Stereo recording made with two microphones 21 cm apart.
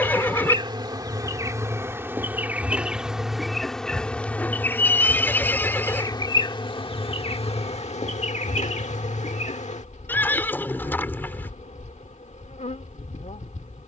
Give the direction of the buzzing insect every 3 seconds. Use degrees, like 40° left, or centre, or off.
10° right, 10° left, 30° left, 30° left, 30° left.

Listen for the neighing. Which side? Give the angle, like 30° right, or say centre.
10° left.